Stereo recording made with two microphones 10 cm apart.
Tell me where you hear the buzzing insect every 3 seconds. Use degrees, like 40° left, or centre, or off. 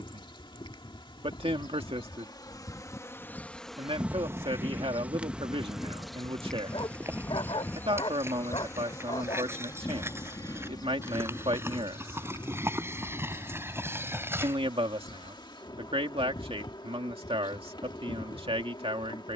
40° left, 10° right, 20° left, 40° left, 50° left, 50° left, 50° left.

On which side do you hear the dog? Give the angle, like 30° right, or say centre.
60° left.